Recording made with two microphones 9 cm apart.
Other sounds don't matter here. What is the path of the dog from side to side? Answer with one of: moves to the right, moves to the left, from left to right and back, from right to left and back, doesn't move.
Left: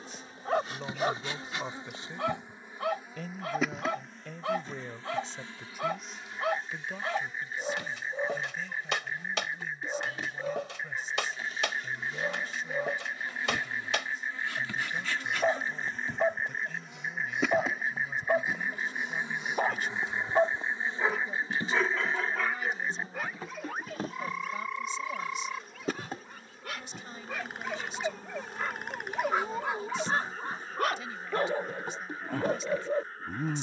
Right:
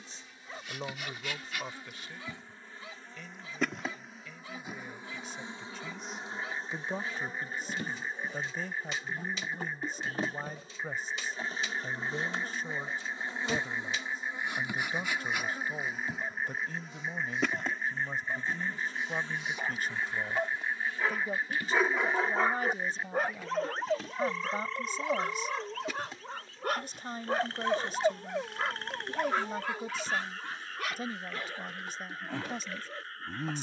from left to right and back.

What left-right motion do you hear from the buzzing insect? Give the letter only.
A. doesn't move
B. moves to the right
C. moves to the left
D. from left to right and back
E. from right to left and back
D.